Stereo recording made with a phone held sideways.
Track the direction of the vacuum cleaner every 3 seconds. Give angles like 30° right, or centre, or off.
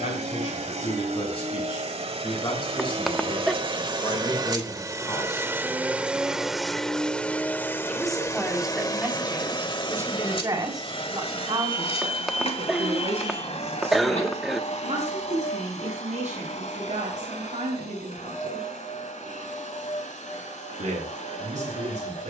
60° right, 30° right, 10° left, 40° left, 60° left, 70° left, 70° left, 70° left.